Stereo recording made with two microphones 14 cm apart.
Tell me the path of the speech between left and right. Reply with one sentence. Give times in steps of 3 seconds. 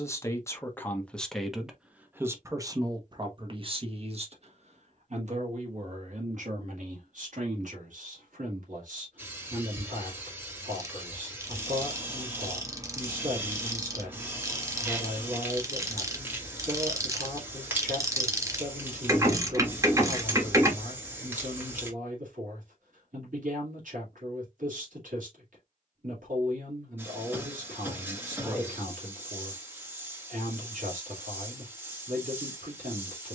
In this clip you hear the speech in the centre from 0 s and on the right from 3 s.